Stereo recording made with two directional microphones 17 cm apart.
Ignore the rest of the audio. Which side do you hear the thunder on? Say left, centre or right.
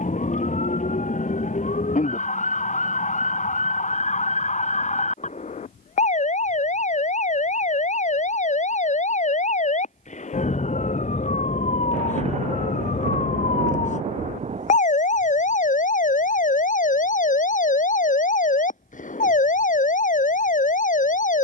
right.